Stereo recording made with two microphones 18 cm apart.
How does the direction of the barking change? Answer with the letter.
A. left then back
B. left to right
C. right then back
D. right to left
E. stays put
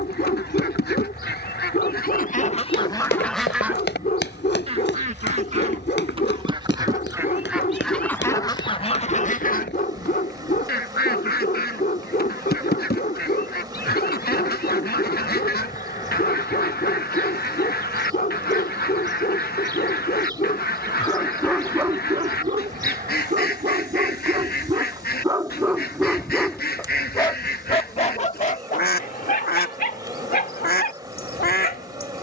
C.